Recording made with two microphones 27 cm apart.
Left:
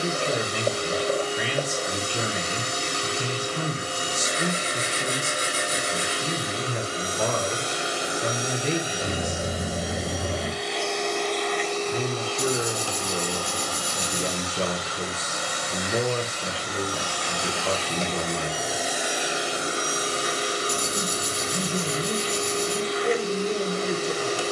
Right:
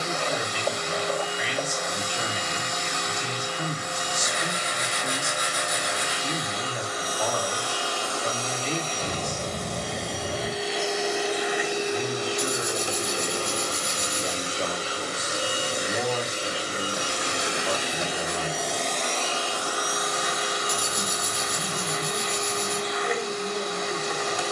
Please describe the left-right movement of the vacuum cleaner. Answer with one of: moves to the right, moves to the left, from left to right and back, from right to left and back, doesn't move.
from left to right and back.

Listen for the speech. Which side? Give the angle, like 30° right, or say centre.
60° left.